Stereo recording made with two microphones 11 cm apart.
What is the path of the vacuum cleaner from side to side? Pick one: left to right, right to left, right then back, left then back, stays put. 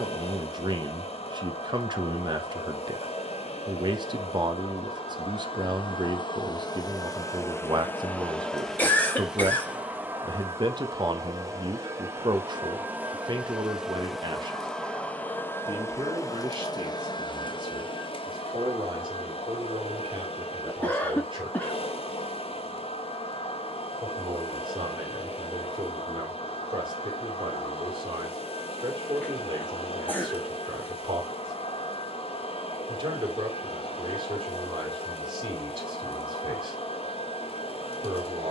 right then back.